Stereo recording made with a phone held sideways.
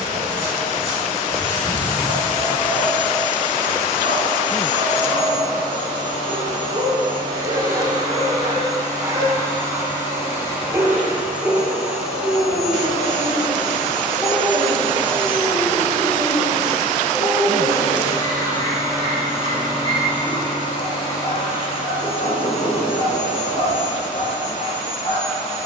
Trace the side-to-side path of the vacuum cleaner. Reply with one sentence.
You can hear the vacuum cleaner travel towards the left.